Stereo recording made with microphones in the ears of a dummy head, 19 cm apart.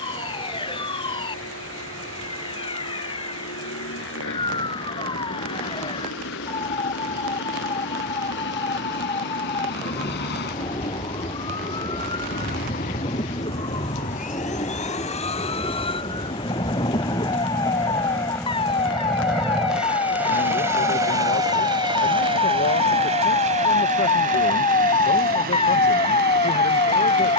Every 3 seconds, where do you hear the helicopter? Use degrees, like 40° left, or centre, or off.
70° left, 70° left, 60° left, 50° left, 40° left, 20° left, centre, 30° right, 40° right.